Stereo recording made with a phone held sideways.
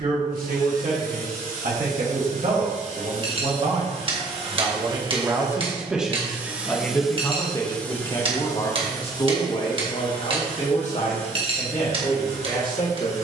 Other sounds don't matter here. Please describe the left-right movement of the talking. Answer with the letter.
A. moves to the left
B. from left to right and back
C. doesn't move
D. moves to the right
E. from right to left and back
A.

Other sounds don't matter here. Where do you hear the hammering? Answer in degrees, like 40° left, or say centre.
40° right.